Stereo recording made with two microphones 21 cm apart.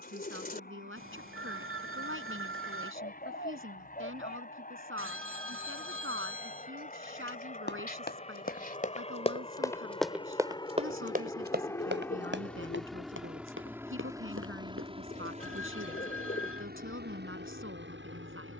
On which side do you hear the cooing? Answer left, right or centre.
left.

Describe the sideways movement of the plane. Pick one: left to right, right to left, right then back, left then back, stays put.
left to right.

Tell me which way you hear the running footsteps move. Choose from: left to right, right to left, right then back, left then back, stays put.
left to right.